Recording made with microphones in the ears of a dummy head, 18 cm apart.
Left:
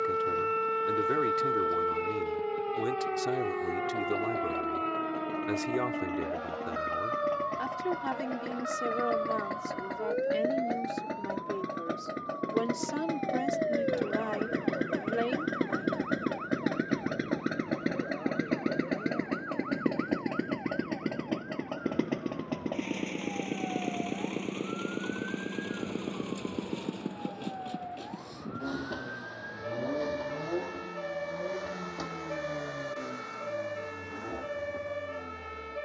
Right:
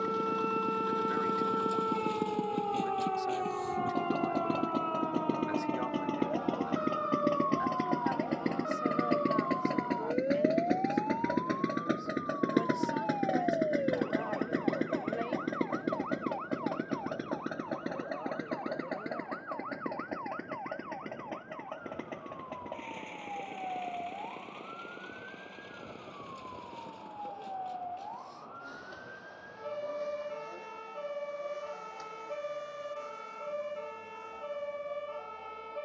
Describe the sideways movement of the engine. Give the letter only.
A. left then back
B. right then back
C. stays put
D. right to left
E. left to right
D.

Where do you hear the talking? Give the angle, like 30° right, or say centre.
60° left.